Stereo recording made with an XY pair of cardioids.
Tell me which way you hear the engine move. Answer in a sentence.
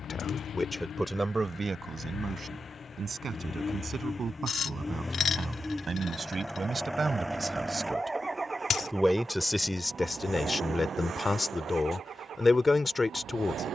In this clip you hear the engine move from left to right.